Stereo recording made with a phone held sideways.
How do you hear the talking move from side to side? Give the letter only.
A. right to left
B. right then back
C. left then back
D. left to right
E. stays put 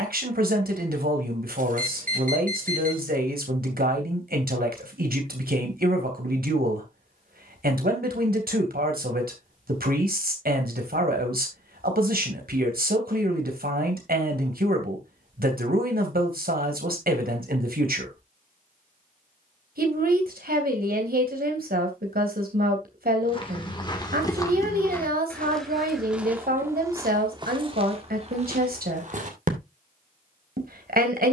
E.